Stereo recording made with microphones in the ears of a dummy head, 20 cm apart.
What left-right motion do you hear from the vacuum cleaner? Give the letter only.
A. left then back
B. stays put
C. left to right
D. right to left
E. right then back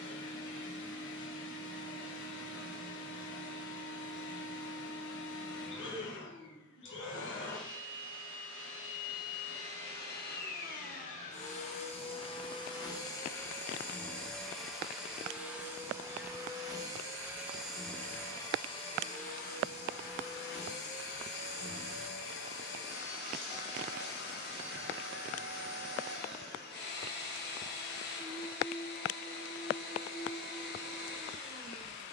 E.